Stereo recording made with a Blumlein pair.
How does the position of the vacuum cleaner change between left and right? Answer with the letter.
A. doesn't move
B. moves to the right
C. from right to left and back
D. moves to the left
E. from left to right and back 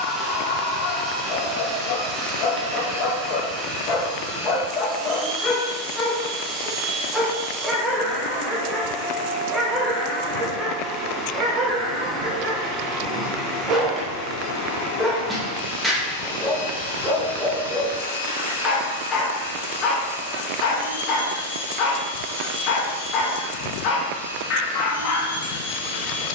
D.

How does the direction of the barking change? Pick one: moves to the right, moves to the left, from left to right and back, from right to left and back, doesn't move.
from left to right and back.